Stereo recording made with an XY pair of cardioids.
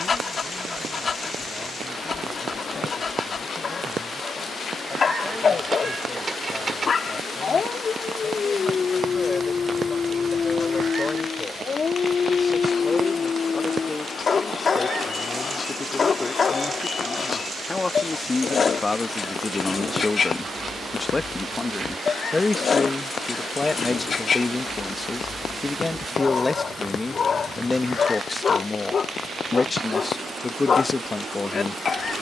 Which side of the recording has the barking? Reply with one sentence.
You can hear the barking on the left.